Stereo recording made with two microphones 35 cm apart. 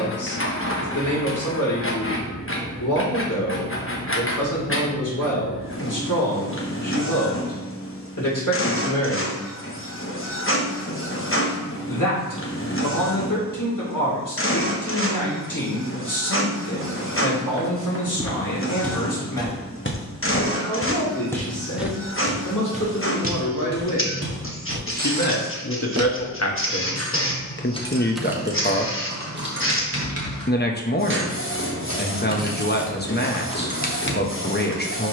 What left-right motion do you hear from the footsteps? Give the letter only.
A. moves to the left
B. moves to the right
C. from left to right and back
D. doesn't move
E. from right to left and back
E.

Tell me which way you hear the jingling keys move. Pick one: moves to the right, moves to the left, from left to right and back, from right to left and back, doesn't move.
from left to right and back.